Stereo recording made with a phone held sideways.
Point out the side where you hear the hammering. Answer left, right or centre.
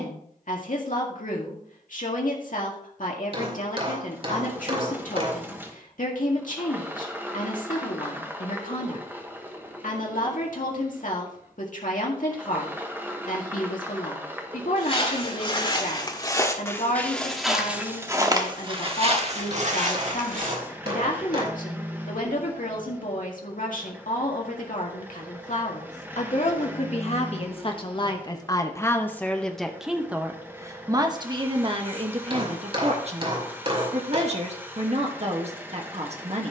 right.